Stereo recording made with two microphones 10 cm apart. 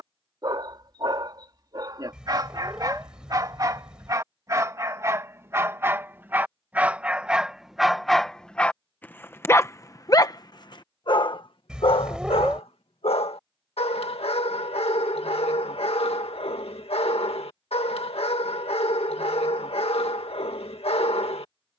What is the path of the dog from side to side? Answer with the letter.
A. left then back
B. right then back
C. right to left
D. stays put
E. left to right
C.